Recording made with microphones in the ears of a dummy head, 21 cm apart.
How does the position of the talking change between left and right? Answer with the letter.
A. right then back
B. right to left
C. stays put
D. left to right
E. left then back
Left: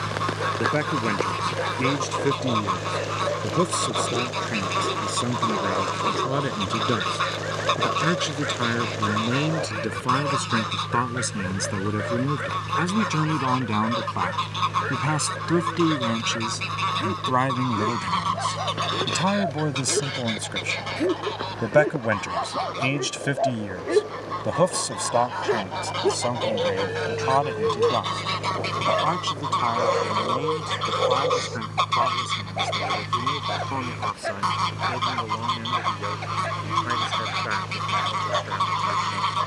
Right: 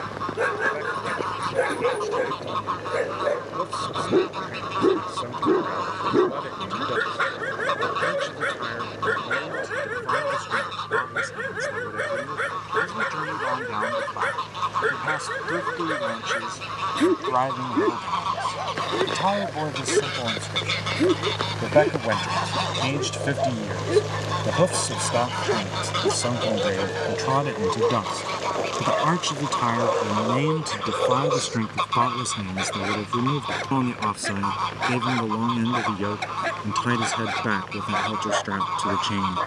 D.